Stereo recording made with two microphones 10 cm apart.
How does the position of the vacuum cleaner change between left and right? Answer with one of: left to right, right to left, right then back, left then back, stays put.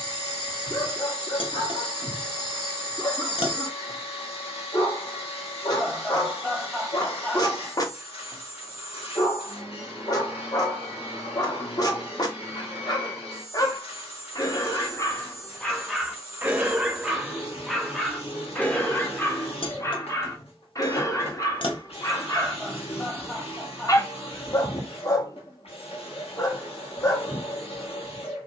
stays put.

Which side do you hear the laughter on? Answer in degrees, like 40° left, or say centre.
10° left.